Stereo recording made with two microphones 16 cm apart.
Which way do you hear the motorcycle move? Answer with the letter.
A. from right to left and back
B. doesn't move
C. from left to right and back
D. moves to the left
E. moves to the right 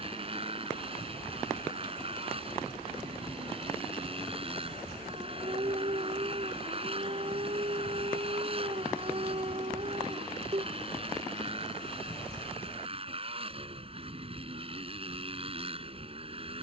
B.